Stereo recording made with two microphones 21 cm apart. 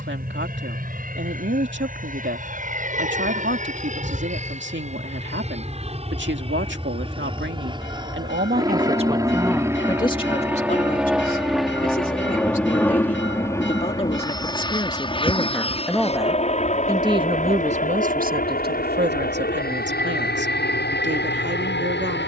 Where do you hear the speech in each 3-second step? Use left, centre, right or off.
right, right, right, left, left, centre, right, right.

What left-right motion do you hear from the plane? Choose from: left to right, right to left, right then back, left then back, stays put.
right to left.